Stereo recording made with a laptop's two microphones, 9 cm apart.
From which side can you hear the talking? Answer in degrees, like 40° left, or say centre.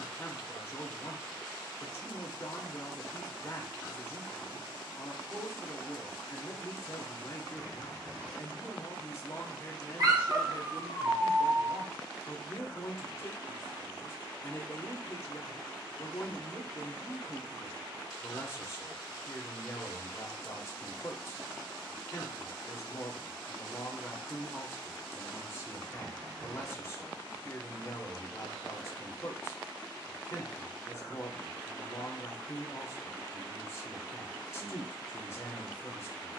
30° left.